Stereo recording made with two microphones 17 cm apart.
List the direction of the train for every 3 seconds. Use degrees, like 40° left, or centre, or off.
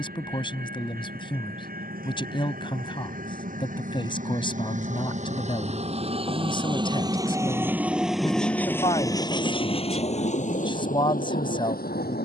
60° right, 50° right, 10° right, 40° left.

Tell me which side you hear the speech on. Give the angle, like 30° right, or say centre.
30° left.